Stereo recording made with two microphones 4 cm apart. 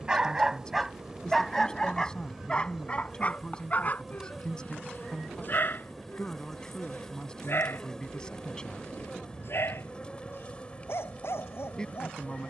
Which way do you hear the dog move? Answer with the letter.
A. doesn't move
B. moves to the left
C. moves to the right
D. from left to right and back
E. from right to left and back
B.